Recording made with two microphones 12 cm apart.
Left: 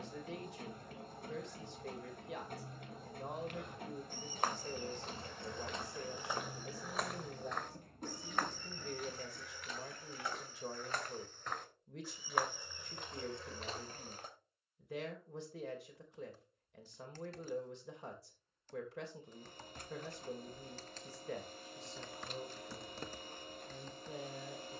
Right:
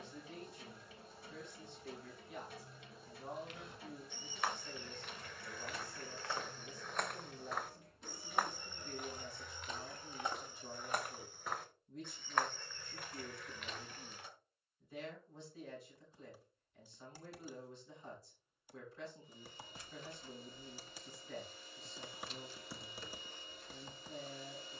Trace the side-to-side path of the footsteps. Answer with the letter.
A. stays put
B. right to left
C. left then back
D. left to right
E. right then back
E.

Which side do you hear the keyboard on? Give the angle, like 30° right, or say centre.
10° right.